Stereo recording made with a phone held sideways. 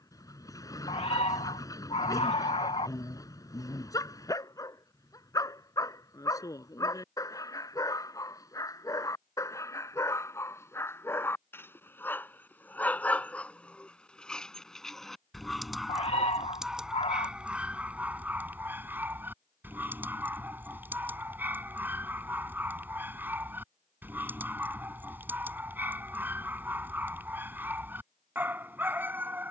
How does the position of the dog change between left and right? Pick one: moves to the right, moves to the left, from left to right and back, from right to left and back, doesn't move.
moves to the right.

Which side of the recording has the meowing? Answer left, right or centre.
left.